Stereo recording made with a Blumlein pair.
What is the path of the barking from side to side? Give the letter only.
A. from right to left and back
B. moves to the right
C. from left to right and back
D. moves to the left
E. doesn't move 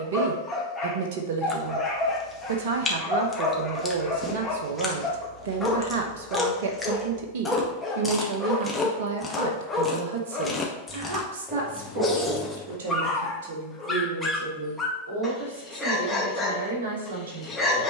E.